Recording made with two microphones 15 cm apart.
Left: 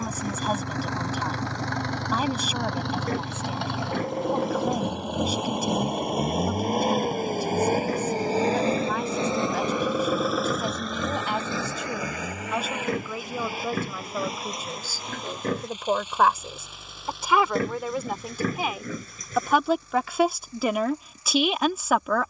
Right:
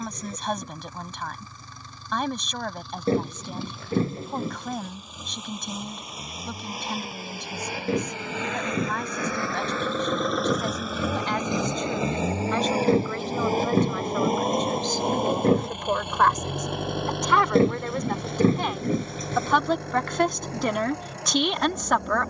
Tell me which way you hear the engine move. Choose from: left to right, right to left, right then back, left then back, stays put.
left to right.